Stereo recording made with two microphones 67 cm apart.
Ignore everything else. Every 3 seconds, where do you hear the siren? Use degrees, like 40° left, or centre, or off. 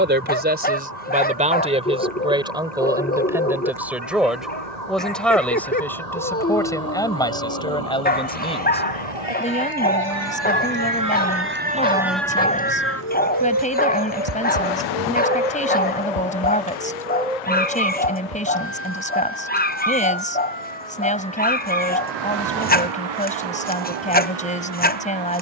80° right, 70° right, 60° right, 30° right, 30° left, 60° left, 70° left, 80° left, 80° left.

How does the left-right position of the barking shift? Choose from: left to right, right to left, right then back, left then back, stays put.
stays put.